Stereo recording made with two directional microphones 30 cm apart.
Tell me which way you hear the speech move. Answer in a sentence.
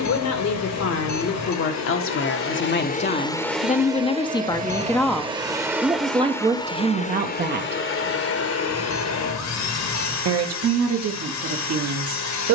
In this clip you hear the speech move from left to right.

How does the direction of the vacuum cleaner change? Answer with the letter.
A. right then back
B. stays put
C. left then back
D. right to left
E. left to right
A.